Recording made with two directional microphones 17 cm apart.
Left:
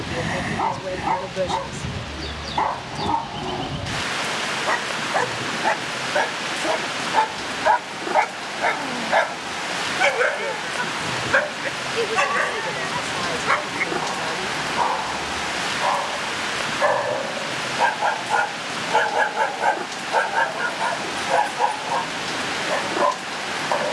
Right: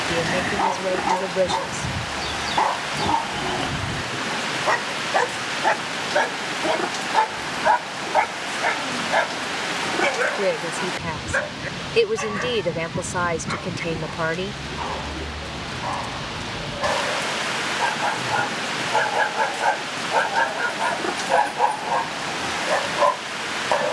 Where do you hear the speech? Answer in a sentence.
You can hear the speech on the right.